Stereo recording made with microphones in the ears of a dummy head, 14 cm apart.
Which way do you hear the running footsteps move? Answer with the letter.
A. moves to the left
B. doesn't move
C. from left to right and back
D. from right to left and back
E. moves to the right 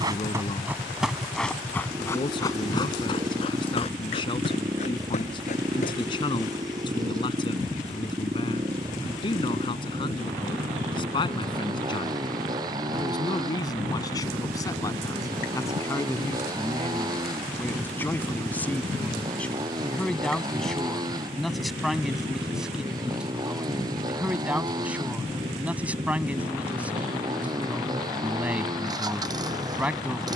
A.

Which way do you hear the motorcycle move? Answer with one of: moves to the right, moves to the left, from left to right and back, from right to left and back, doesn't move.
doesn't move.